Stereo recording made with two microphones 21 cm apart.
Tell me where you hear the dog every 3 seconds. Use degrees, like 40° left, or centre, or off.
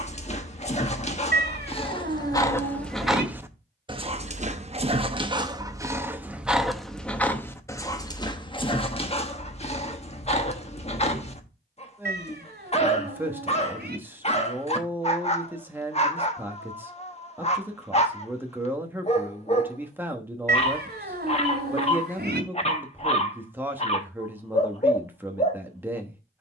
20° left, 20° right, 10° left, 30° left, 30° left, 30° left, 30° left, 30° left, 30° left.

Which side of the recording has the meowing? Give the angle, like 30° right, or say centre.
50° right.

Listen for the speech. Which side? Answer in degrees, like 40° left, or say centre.
10° right.